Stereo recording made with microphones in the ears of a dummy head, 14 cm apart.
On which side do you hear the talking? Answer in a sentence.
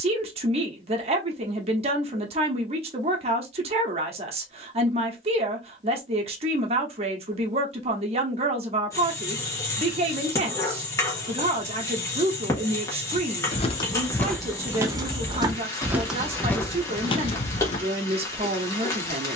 You can hear the talking on the right.